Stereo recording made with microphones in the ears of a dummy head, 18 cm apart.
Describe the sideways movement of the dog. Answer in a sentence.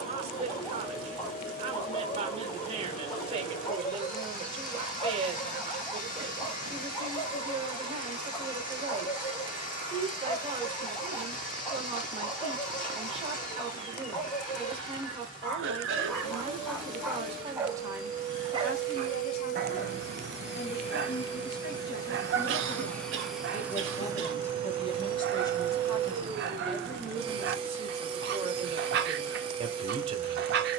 In this clip you hear the dog move from left to right.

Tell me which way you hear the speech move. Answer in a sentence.
In this clip you hear the speech move from right to left and back again.